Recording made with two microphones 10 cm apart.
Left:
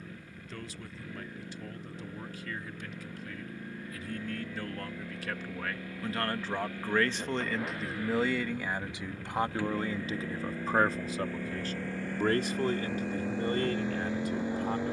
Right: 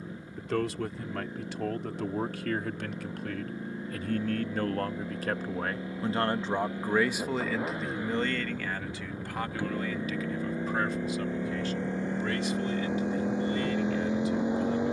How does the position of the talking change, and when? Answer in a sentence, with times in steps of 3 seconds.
In this clip you hear the talking on the right from 0 s, in the centre from 6 s and on the left from 9 s.